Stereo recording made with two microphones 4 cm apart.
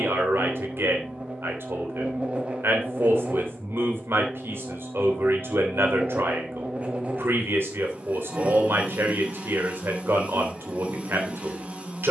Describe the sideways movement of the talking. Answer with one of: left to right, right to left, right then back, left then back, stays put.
stays put.